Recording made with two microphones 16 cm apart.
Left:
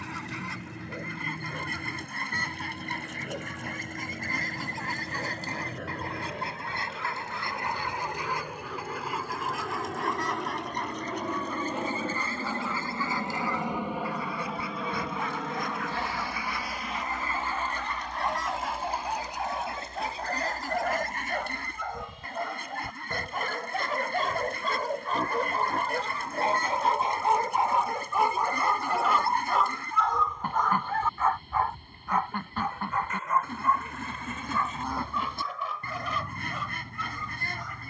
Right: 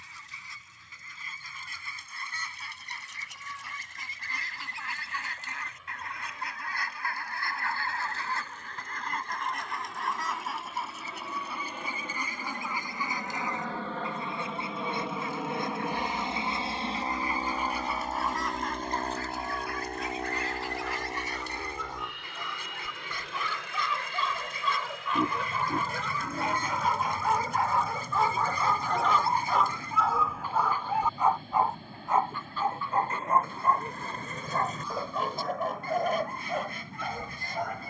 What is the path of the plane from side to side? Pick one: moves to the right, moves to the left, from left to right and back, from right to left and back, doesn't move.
moves to the right.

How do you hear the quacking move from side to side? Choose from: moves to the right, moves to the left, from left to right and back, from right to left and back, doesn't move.
from left to right and back.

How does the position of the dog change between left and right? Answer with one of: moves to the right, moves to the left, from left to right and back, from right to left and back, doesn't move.
moves to the right.